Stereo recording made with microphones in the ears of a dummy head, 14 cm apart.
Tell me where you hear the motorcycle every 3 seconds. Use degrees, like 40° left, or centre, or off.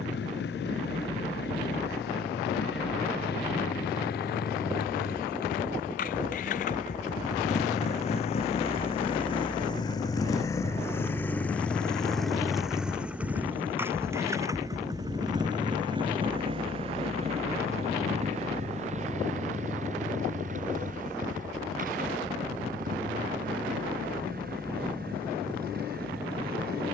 70° left, 60° left, 50° left, 20° left, 10° right, 30° right, 50° right, 50° right, 60° right.